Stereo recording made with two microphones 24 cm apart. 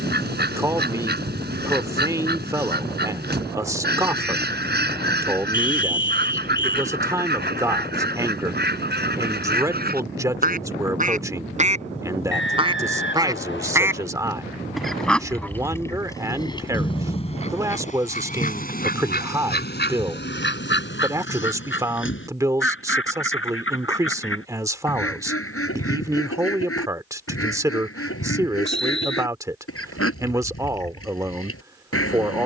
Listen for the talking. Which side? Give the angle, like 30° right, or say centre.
10° right.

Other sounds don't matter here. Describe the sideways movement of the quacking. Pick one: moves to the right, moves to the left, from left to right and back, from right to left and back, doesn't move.
moves to the left.